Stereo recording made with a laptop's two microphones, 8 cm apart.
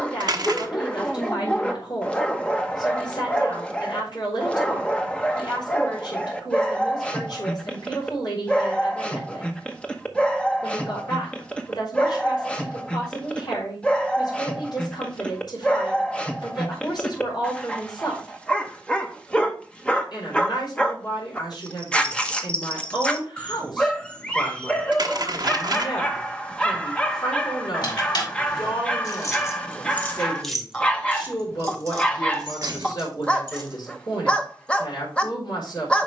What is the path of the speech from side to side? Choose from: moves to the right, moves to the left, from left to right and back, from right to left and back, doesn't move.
doesn't move.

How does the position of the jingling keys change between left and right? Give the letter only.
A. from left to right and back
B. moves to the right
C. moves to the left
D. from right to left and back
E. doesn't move
B.